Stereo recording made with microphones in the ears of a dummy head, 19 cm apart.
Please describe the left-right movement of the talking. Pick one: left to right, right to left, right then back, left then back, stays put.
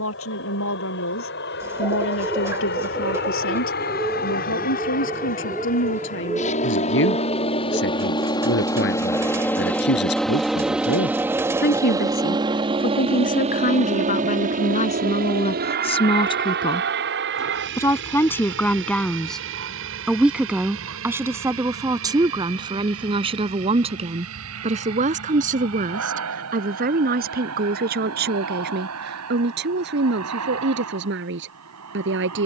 left to right.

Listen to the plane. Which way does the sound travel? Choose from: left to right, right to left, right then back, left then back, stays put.
left to right.